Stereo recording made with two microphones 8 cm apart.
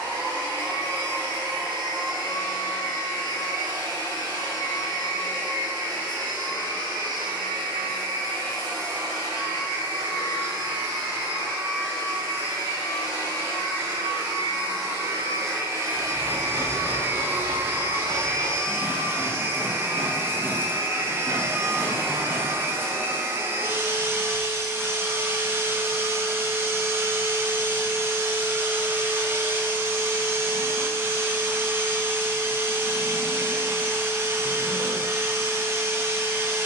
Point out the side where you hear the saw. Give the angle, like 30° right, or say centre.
40° right.